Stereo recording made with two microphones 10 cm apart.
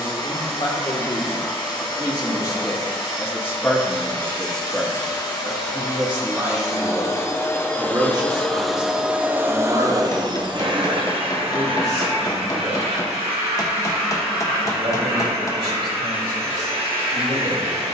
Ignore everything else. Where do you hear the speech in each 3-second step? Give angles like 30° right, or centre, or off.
50° left, 10° left, 30° right, 50° right, 60° right, 60° right.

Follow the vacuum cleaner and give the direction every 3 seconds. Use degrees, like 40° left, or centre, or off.
50° left, 50° left, 20° left, 50° right, 80° right, 80° right.